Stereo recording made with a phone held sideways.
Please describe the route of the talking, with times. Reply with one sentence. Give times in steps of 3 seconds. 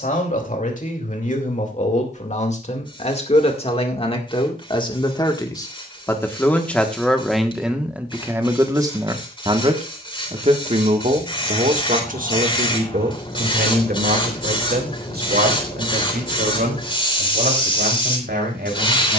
You can hear the talking on the left from 0 s, in the centre from 6 s and on the right from 9 s.